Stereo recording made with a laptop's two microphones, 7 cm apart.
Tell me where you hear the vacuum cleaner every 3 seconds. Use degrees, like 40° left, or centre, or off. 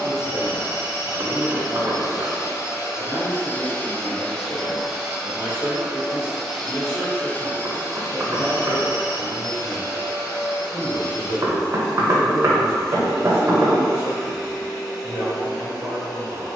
60° left, 10° left, 20° left, 70° left, 70° left, 70° left.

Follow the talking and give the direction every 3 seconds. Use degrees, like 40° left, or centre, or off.
20° right, 30° left, centre, 30° right, 30° right, 30° right.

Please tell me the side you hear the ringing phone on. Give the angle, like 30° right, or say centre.
40° left.